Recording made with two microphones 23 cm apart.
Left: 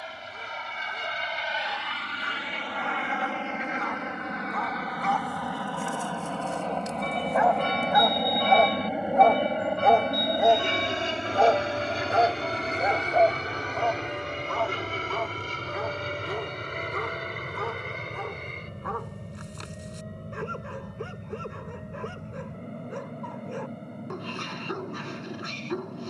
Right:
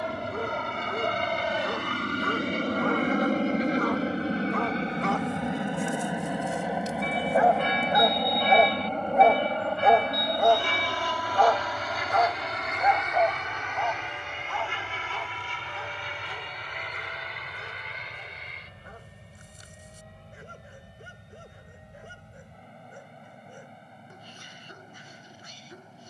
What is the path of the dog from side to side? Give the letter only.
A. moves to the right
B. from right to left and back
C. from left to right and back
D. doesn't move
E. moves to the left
E.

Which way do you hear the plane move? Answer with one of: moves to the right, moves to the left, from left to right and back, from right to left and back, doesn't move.
moves to the left.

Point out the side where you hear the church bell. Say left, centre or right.
left.